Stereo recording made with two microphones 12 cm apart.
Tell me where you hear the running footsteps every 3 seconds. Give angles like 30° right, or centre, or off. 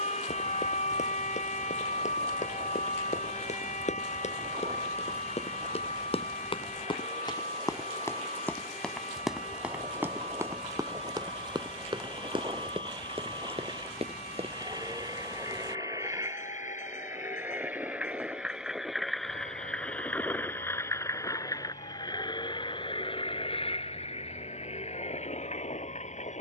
80° left, 60° left, 30° left, 20° right, 50° right, off, off, off, off.